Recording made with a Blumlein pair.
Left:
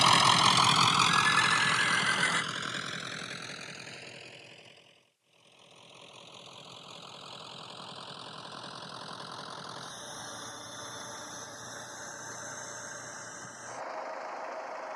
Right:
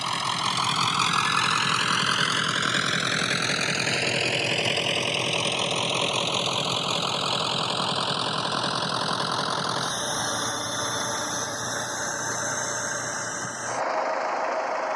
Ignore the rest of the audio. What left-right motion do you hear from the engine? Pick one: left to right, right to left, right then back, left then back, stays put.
left to right.